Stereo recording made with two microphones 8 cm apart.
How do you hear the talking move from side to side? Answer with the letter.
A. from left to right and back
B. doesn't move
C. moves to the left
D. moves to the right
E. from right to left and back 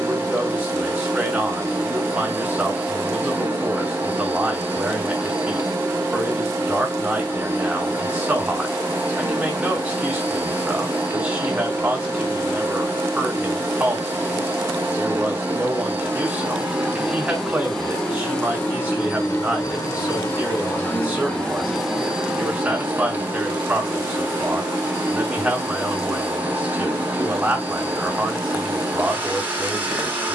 B.